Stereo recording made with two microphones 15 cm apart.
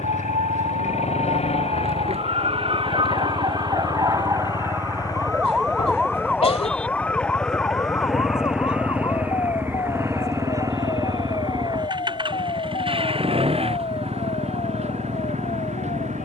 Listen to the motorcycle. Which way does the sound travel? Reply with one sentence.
You can hear the motorcycle move to the right.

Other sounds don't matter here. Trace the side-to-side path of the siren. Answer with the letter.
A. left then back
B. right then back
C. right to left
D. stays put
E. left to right
C.